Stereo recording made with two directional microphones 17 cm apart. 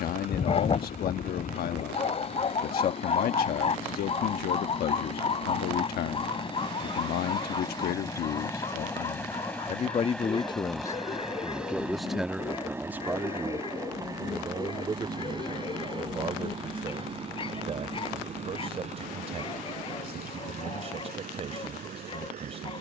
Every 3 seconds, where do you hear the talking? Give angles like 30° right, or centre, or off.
60° left, 60° left, 60° left, 30° left, 10° right, 30° right, 40° right, 40° right.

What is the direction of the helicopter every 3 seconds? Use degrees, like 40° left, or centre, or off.
50° left, 40° left, 20° left, centre, 20° right, 30° right, 40° right, 50° right.